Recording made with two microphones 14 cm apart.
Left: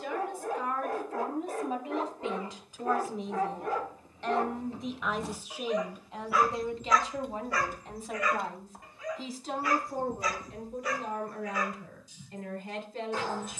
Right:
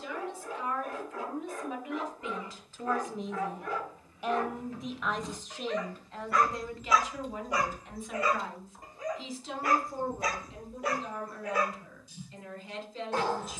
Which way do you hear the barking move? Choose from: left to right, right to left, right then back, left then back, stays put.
left to right.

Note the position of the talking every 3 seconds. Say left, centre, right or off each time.
left, centre, left, left, left.